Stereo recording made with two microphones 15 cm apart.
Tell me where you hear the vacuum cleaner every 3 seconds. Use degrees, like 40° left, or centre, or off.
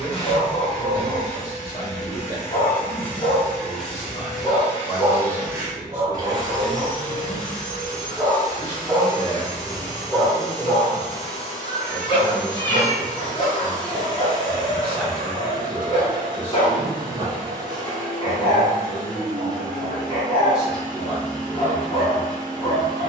20° left, 10° right, 30° right, 30° right, 30° right, 30° right, 30° right, 30° right.